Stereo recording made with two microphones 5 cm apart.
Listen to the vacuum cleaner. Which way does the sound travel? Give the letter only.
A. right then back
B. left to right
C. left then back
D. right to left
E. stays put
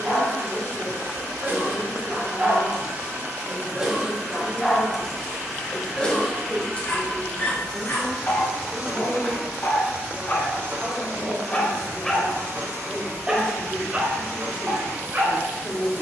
C.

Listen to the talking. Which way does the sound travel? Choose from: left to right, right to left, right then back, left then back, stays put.
right then back.